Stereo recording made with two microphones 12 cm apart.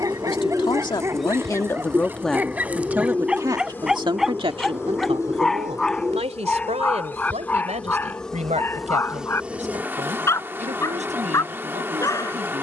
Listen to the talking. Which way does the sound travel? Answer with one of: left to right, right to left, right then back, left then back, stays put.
left to right.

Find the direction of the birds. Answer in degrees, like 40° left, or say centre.
10° right.